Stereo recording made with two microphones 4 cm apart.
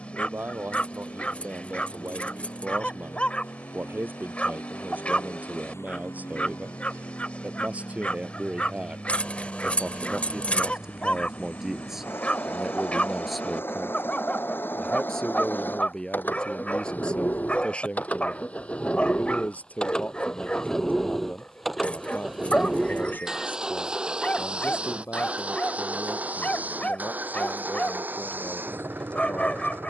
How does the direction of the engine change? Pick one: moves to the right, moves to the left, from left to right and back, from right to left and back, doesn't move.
moves to the right.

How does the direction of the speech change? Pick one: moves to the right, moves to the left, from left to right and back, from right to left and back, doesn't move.
moves to the left.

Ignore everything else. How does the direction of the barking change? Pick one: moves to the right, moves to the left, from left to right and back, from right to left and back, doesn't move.
doesn't move.